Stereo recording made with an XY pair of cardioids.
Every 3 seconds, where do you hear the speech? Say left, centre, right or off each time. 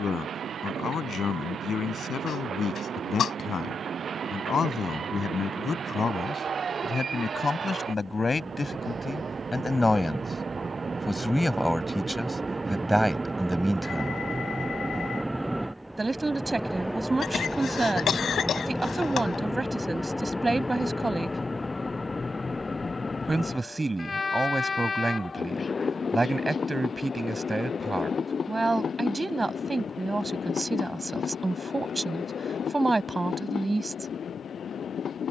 left, left, left, centre, centre, right, right, right, right, right, right, right.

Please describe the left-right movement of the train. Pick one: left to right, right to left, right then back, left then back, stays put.
right to left.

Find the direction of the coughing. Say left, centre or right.
left.